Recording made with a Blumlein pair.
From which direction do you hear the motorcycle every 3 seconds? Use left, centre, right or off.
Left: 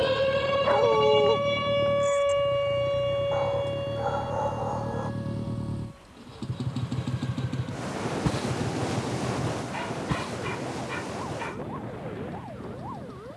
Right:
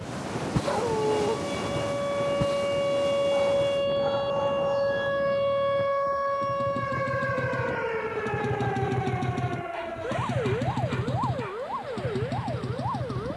left, left, centre, right, right.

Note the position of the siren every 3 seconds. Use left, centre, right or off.
left, right, right, right, right.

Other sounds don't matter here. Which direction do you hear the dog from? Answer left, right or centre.
centre.